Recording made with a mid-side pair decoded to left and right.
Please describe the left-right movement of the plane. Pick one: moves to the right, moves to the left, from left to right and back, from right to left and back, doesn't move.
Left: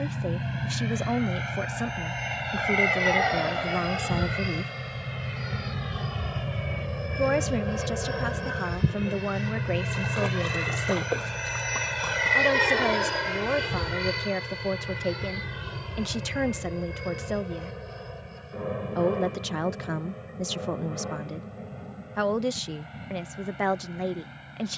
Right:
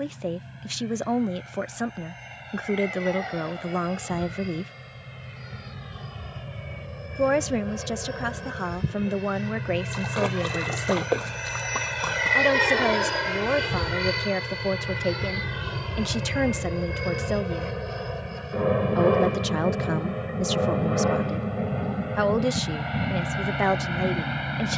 moves to the right.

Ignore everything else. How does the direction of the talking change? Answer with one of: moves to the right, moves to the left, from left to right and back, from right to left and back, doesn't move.
doesn't move.